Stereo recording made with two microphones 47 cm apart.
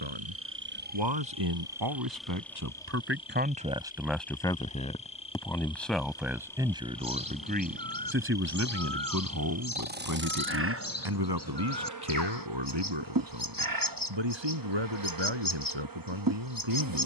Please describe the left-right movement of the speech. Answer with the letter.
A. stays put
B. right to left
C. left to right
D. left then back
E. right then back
D.